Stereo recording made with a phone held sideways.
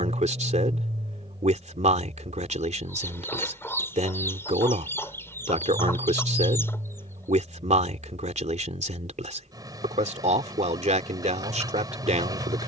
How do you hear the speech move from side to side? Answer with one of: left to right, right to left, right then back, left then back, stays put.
stays put.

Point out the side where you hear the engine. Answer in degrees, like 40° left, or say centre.
30° right.